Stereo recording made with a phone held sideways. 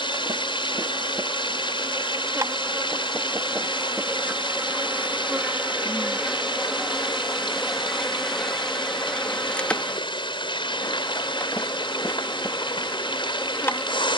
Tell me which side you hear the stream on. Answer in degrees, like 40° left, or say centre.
40° left.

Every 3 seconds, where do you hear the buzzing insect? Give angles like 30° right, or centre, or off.
30° right, 10° right, centre, 10° left, 20° left.